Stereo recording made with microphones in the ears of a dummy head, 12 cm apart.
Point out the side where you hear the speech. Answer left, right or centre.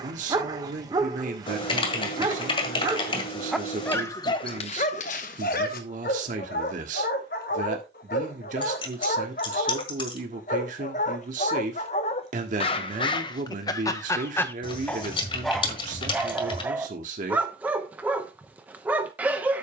right.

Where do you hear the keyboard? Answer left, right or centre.
left.